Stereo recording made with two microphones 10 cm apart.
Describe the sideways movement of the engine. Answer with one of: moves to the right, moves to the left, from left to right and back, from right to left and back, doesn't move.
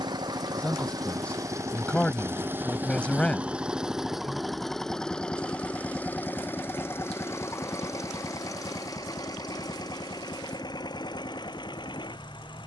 moves to the left.